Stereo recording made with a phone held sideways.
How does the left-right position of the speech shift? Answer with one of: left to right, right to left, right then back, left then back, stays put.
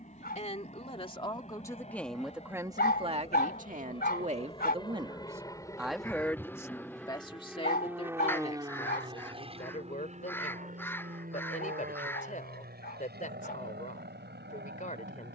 right then back.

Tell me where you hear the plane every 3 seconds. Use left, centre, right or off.
left, left, centre, right, right.